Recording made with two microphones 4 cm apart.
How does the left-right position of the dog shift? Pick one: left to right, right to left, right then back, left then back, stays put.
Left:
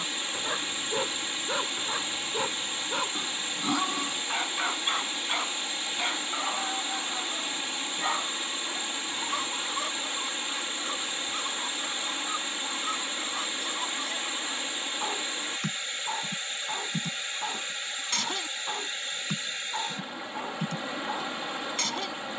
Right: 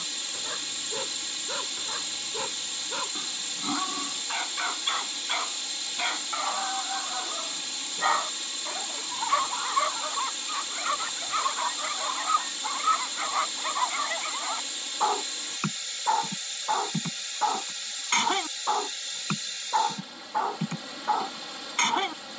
left to right.